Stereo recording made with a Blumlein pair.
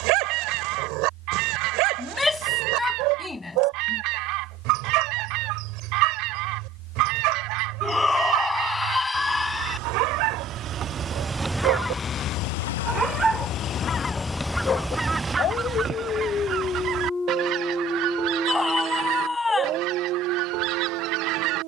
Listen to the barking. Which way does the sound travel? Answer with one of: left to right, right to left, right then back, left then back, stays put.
left then back.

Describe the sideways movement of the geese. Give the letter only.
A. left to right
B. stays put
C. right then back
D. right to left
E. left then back
E.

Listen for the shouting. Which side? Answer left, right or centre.
centre.